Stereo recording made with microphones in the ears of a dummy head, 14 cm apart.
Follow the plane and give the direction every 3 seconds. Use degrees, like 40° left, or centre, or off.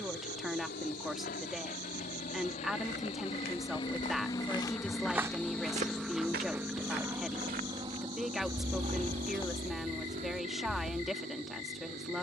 50° left, 20° left, 20° right, 40° right.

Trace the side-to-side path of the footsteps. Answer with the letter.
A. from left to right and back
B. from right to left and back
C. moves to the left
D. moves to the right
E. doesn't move
A.